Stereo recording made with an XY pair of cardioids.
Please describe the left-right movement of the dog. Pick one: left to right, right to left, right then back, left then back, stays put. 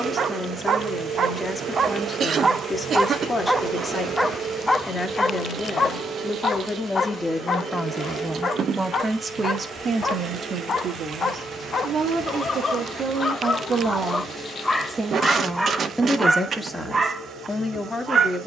left then back.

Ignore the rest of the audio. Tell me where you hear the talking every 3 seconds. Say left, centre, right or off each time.
left, left, centre, right, right, centre.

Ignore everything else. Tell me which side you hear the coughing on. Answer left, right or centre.
right.